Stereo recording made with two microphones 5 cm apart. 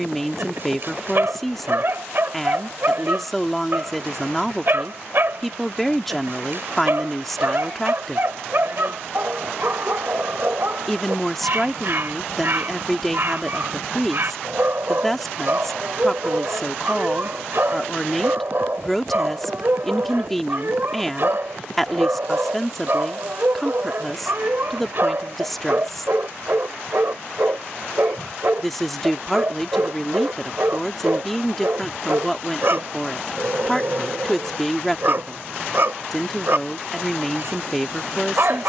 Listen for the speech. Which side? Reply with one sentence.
You can hear the speech in the centre.